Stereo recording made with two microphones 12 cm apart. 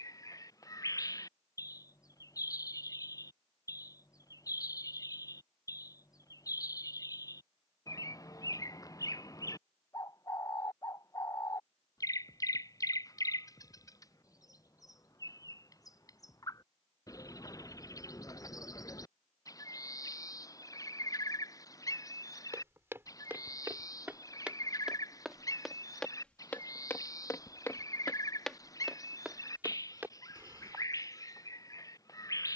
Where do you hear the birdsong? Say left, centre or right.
left.